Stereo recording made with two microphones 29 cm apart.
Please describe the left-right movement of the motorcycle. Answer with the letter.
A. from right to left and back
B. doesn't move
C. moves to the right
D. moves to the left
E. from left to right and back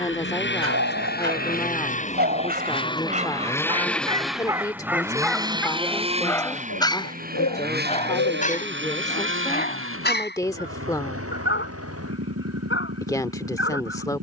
C.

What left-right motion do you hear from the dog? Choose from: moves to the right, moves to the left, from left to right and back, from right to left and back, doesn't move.
moves to the left.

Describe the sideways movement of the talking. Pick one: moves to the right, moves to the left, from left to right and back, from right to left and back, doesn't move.
doesn't move.